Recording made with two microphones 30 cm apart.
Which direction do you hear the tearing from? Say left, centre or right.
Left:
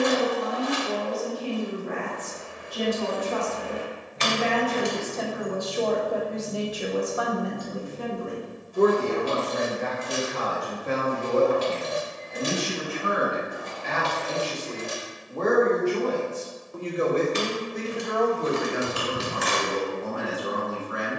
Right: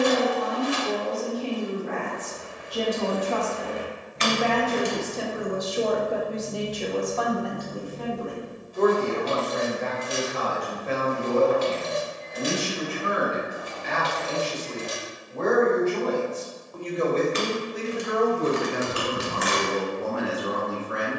left.